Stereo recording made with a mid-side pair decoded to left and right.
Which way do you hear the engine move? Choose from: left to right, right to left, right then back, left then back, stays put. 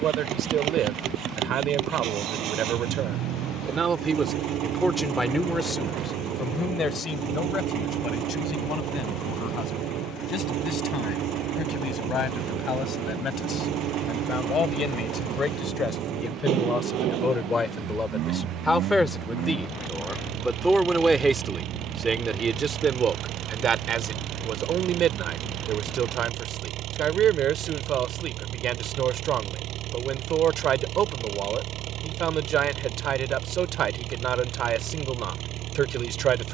stays put.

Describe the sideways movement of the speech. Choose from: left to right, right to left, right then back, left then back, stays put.
left then back.